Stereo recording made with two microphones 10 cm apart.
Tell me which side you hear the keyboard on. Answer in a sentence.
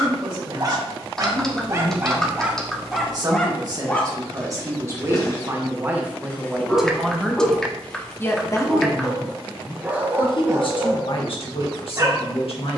You can hear the keyboard in the centre.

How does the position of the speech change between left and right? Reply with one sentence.
You can hear the speech move to the left.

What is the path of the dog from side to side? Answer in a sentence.
You can hear the dog go left and come back.